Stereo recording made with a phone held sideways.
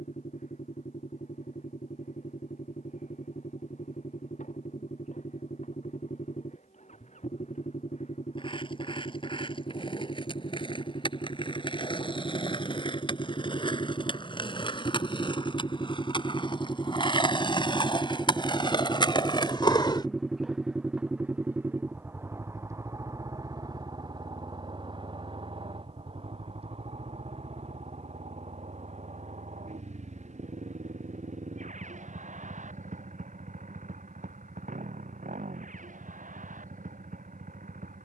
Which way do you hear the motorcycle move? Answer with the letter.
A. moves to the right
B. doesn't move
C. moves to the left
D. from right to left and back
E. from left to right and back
A.